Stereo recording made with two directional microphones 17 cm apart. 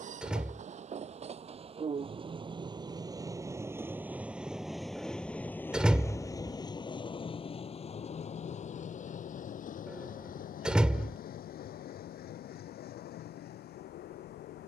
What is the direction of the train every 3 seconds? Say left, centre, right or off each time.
right, centre, left, left, left.